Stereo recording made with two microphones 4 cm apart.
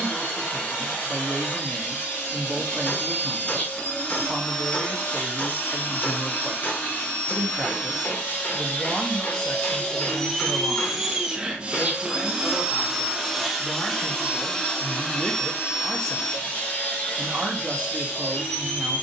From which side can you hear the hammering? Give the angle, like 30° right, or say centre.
50° left.